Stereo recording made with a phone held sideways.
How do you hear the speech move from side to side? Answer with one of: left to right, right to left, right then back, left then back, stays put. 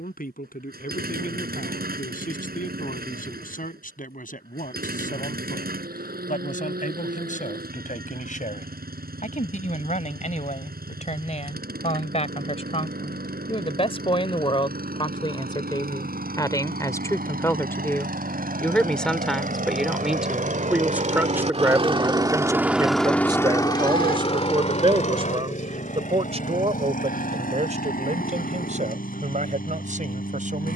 left to right.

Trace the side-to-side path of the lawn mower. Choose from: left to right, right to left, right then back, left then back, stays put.
right to left.